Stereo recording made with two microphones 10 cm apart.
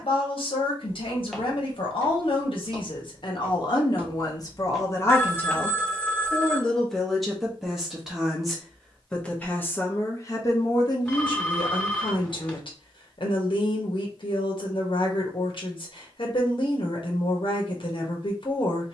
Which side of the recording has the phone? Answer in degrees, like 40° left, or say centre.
10° left.